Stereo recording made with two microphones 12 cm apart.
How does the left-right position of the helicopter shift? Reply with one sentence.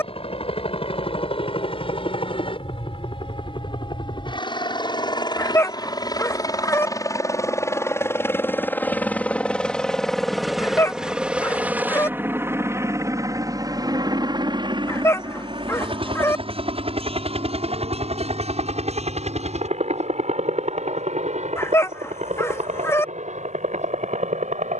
In this clip you hear the helicopter travel towards the right.